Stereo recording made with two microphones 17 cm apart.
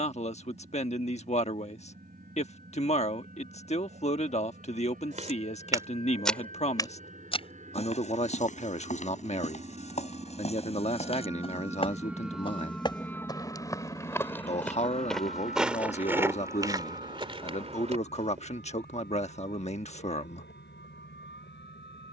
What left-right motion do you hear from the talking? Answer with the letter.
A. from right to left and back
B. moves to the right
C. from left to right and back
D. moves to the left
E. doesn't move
E.